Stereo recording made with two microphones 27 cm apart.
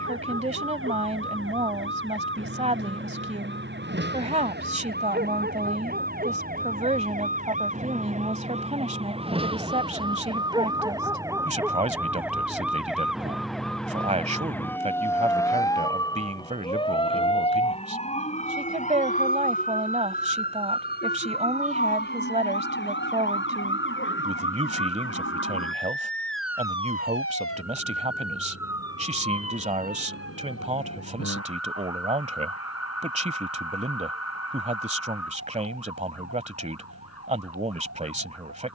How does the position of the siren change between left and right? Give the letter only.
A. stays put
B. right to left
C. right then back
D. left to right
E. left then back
B.